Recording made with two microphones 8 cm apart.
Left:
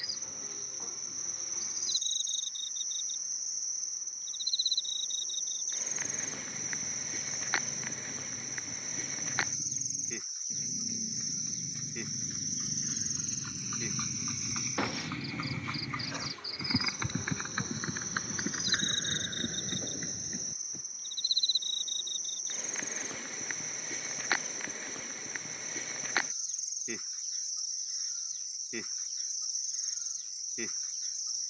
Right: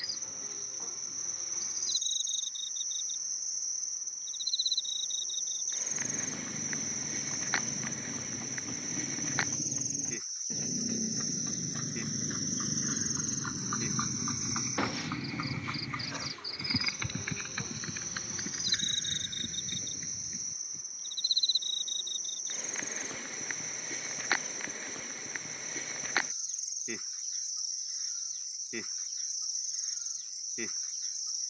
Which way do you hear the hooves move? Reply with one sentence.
In this clip you hear the hooves go from the right side to the left.